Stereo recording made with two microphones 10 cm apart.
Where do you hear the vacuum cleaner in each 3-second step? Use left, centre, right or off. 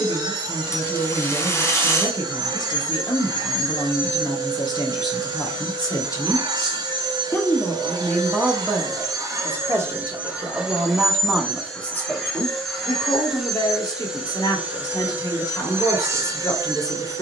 right, right, right, centre, centre, right.